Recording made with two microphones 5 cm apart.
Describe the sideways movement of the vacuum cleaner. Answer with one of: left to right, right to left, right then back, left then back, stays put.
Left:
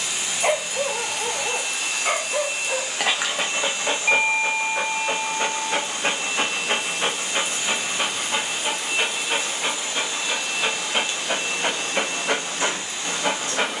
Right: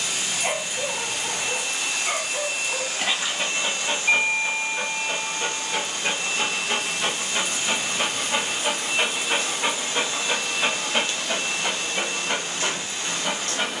stays put.